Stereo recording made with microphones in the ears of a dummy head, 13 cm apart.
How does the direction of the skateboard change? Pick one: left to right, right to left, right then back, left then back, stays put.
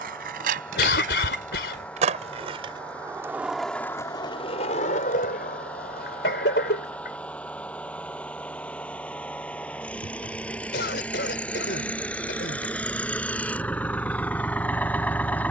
right to left.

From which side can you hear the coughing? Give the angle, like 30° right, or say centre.
80° left.